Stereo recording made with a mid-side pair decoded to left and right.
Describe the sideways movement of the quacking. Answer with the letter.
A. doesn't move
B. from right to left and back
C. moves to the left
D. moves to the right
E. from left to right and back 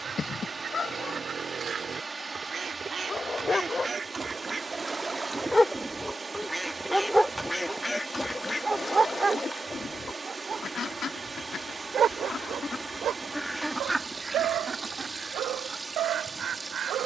B.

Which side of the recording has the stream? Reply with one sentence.
In this clip you hear the stream on the right.